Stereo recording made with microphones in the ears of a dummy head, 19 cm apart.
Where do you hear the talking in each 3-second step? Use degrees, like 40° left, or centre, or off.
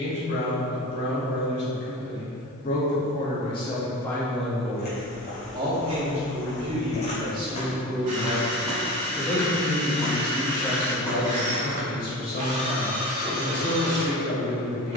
50° left, 10° left, 20° right, 20° left, 50° left.